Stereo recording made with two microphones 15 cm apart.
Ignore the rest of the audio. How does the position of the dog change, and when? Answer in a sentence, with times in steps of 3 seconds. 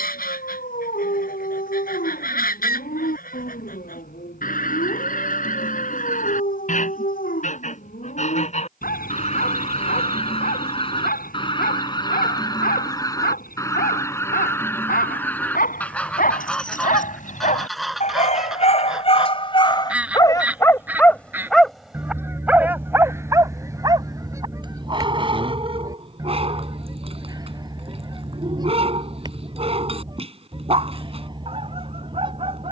In this clip you hear the dog on the left from 0 s, in the centre from 21 s and on the right from 24 s.